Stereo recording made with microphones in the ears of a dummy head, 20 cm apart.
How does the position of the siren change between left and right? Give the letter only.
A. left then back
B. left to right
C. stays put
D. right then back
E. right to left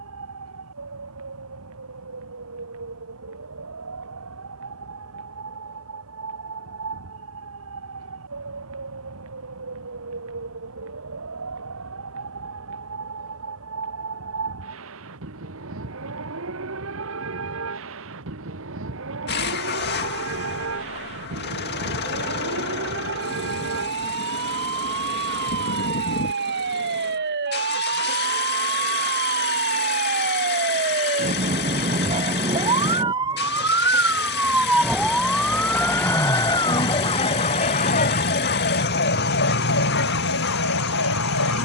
E.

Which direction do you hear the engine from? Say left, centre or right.
left.